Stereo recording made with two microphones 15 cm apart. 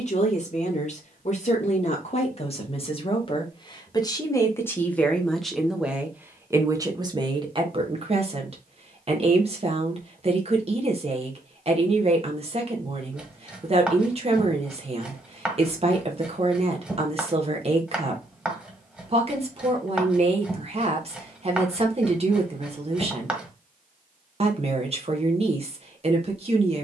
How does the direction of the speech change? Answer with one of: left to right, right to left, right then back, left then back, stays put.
left to right.